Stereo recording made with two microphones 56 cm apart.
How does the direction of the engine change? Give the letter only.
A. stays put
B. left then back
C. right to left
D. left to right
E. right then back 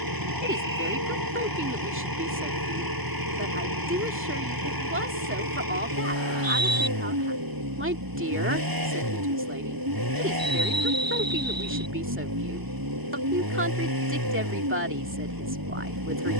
A.